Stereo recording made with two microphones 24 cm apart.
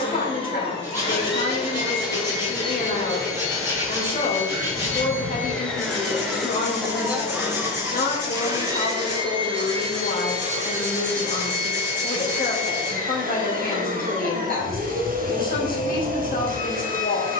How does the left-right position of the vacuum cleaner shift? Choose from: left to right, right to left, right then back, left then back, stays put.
left to right.